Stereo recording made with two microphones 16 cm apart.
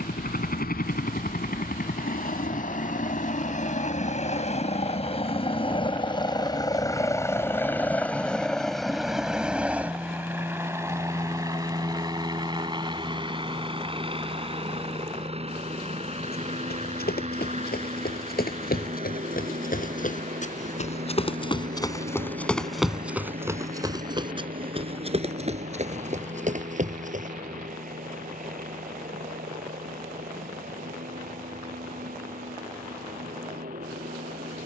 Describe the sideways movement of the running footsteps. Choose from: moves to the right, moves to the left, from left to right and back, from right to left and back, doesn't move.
moves to the right.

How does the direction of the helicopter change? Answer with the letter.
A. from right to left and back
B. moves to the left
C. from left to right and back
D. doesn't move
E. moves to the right
E.